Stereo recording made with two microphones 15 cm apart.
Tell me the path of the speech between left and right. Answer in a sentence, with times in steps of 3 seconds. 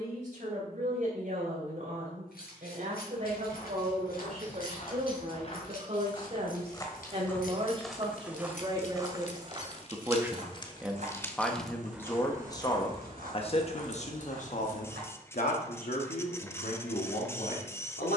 You can hear the speech on the right from 0 s, in the centre from 9 s and on the left from 12 s.